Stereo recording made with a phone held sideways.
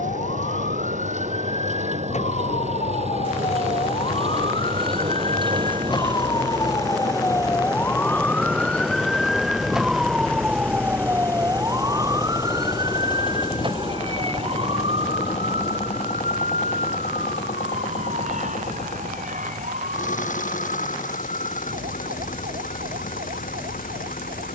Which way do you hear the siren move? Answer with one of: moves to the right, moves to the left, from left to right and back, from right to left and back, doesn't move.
moves to the right.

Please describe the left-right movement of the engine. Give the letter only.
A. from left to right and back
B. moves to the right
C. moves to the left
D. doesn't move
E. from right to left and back
C.